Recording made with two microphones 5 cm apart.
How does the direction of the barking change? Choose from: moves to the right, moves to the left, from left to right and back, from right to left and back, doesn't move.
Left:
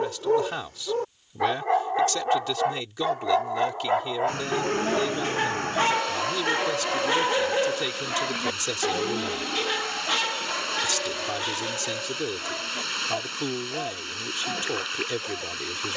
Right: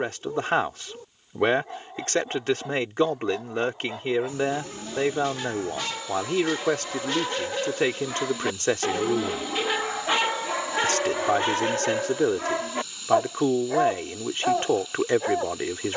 moves to the right.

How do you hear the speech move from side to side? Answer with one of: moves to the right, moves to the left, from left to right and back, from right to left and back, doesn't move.
doesn't move.